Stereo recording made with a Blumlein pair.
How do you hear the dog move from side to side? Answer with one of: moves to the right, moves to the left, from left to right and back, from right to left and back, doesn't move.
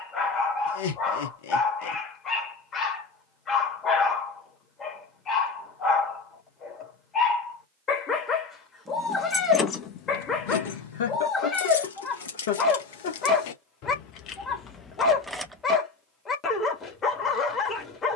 doesn't move.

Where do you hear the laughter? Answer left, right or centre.
left.